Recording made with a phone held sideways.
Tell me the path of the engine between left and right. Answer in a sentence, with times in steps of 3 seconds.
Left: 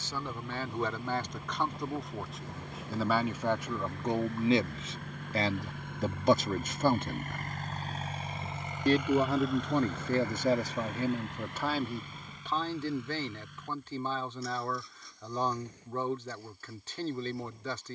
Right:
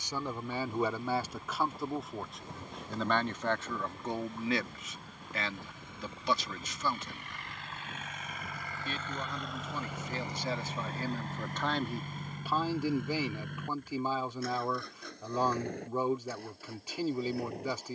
In this clip you hear the engine on the left from 0 s and on the right from 9 s.